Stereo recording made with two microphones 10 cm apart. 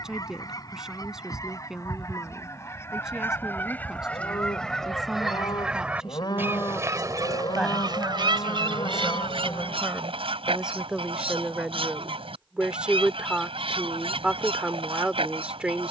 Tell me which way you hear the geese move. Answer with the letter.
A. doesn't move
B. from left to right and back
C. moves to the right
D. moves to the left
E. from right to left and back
C.